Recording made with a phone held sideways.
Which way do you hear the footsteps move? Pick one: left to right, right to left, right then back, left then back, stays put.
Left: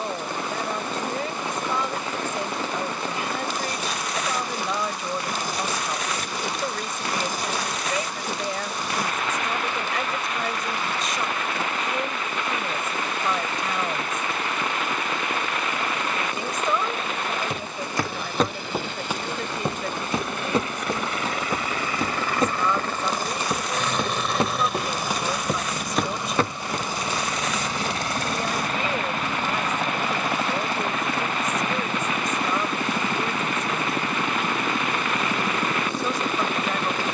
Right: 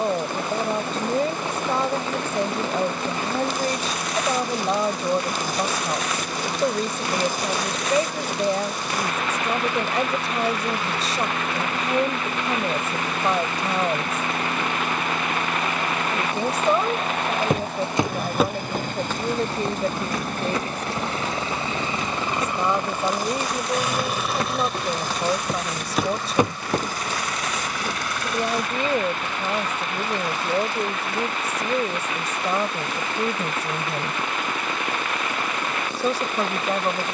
left then back.